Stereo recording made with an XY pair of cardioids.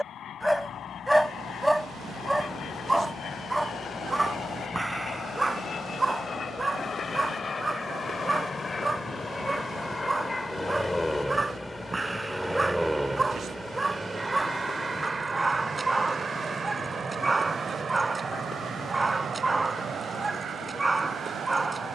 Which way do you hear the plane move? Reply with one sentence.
You can hear the plane go from the left side to the right.